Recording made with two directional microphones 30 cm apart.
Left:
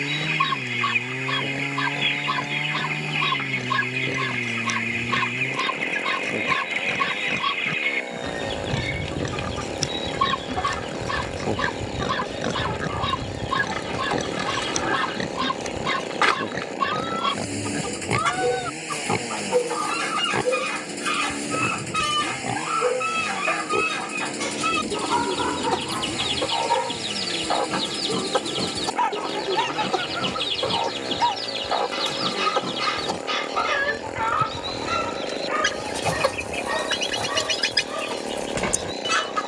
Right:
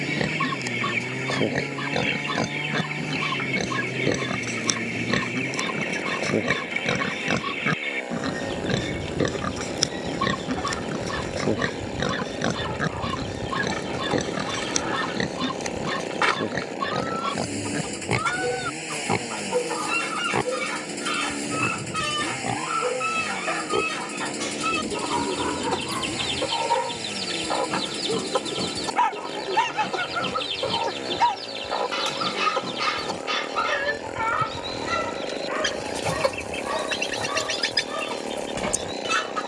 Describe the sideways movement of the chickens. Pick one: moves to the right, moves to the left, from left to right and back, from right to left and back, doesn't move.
doesn't move.